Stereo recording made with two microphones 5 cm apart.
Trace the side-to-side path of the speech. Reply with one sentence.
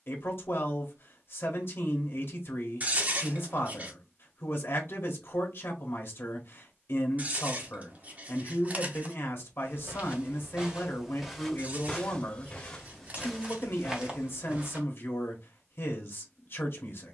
You can hear the speech stay in one place.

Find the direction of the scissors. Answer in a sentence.
You can hear the scissors on the right.